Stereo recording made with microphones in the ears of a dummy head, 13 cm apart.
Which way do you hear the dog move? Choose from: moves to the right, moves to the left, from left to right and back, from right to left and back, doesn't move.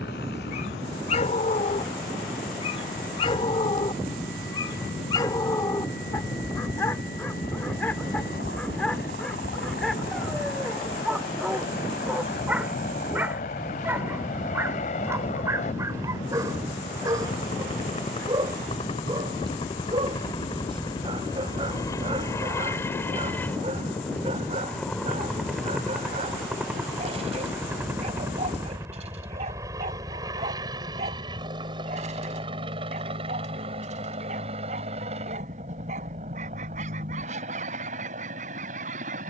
moves to the right.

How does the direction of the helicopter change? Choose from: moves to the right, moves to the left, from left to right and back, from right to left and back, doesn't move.
moves to the right.